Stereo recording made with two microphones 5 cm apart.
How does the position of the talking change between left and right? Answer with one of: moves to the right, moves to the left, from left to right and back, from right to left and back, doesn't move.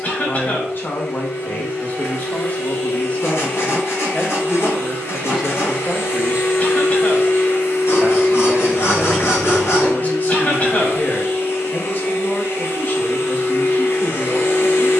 from left to right and back.